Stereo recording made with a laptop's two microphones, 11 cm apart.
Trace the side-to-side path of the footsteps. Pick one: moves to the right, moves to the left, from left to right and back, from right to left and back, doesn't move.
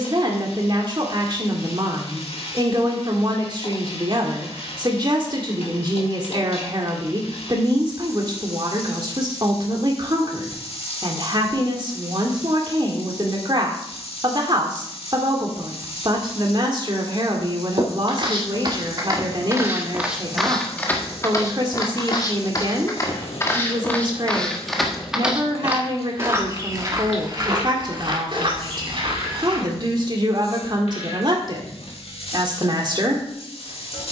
from right to left and back.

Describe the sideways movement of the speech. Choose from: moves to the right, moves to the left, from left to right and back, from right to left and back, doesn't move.
doesn't move.